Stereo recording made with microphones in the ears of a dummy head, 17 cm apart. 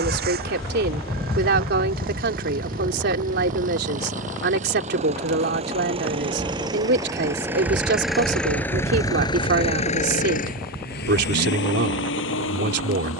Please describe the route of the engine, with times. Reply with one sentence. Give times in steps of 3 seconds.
In this clip you hear the engine on the right from 0 s, in the centre from 6 s and on the left from 9 s.